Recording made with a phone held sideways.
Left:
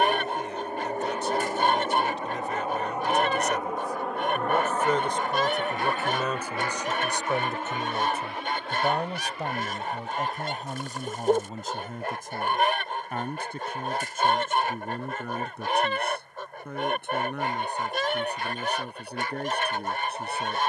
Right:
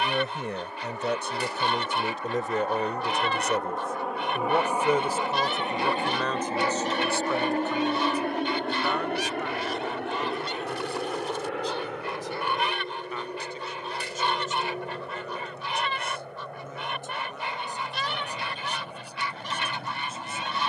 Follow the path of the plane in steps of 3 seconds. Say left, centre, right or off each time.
left, centre, right, right, right, right, right.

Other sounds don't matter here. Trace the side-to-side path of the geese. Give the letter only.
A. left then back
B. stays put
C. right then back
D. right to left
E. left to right
B.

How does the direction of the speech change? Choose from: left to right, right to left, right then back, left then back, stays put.
right to left.